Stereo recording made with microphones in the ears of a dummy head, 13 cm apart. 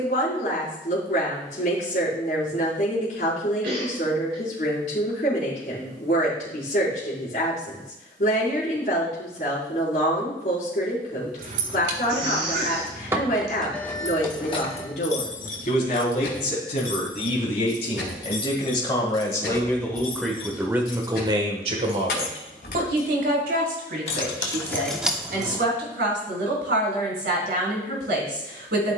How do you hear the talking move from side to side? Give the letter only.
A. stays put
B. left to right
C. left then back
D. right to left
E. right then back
B.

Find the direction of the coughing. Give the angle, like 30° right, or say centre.
70° right.